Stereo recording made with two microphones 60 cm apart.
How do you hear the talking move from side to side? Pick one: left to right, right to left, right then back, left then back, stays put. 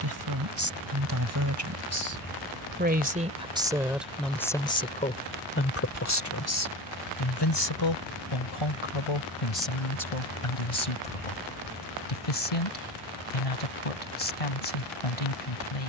right to left.